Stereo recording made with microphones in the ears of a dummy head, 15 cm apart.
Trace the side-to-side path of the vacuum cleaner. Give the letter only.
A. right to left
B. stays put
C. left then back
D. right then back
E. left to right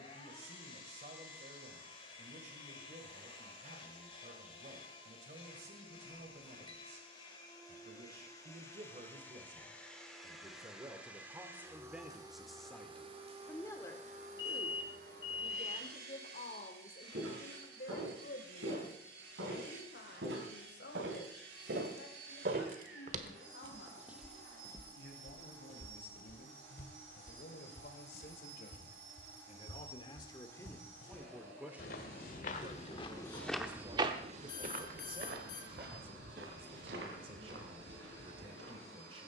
E.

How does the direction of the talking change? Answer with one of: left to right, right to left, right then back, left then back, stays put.
left then back.